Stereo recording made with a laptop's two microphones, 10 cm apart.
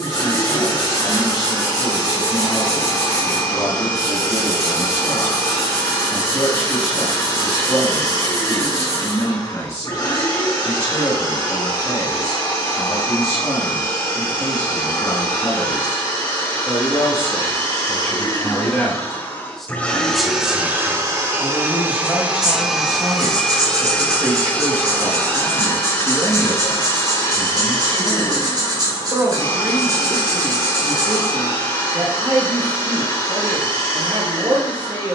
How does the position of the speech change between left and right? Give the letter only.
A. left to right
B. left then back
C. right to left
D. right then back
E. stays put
A.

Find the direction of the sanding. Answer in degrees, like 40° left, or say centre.
40° right.